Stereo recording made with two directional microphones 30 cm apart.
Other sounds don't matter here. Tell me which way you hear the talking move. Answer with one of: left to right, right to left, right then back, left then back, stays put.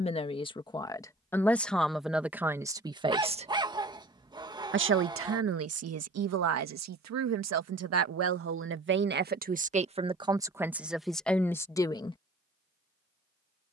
right then back.